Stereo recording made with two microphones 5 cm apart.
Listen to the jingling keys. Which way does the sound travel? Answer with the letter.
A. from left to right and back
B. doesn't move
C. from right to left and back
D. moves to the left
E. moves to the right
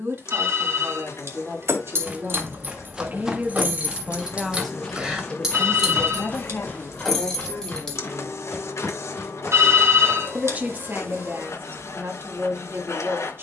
D.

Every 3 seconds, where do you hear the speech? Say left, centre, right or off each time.
right, centre, left, right, right.